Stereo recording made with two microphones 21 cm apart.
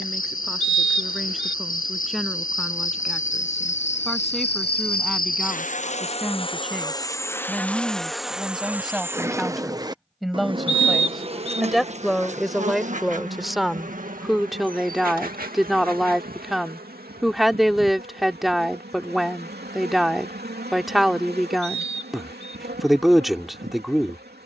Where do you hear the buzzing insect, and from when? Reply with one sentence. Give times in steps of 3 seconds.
In this clip you hear the buzzing insect on the left from 0 s, in the centre from 6 s and on the right from 9 s.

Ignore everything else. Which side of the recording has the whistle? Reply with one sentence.
You can hear the whistle on the left.